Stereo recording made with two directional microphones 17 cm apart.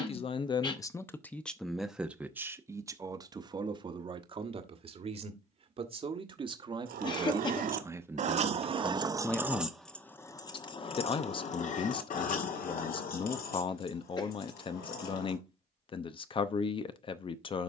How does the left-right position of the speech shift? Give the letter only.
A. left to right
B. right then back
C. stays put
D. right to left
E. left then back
B.